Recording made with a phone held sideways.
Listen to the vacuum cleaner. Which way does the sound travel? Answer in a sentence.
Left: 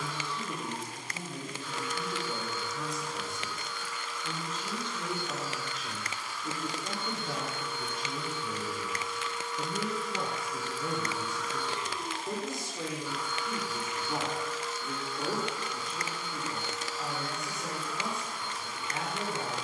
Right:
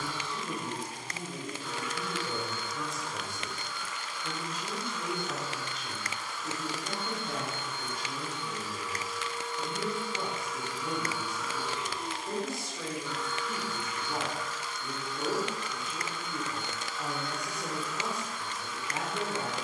In this clip you hear the vacuum cleaner move to the left.